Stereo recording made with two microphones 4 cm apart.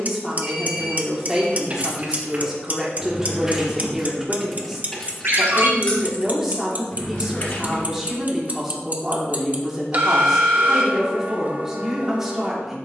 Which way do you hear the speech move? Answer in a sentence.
In this clip you hear the speech stay in one place.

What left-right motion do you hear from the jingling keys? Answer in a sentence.
You can hear the jingling keys move to the left.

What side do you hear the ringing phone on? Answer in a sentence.
You can hear the ringing phone on the right.